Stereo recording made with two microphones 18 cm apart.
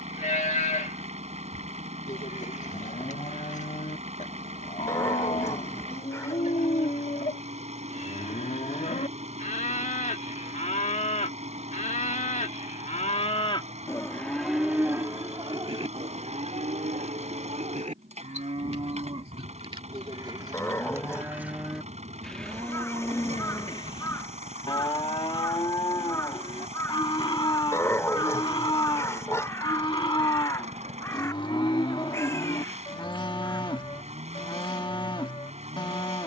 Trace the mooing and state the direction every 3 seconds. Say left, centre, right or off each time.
left, left, left, left, left, right, right, centre, left, left, left, left.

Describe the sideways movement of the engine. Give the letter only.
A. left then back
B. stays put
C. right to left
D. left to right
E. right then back
B.